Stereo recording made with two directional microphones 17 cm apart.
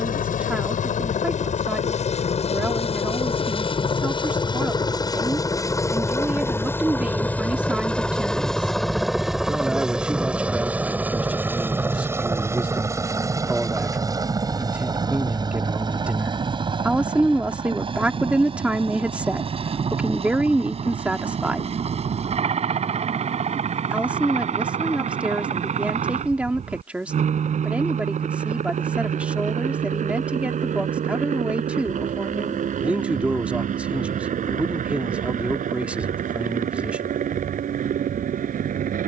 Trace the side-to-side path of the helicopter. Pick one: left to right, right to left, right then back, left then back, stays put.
left to right.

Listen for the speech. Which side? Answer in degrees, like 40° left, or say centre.
10° right.